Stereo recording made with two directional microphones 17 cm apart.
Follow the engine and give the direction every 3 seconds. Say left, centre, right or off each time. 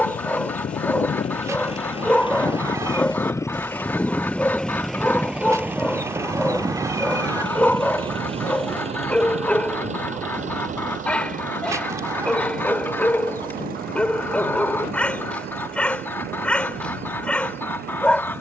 left, centre, right, right, right, right.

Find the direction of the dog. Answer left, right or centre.
centre.